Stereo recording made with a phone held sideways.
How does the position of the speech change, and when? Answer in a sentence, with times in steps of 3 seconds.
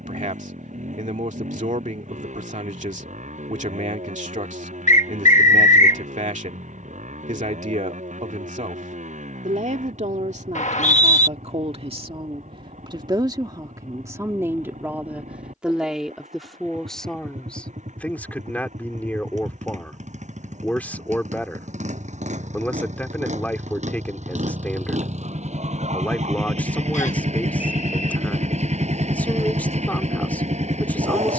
In this clip you hear the speech on the right from 0 s and in the centre from 15 s.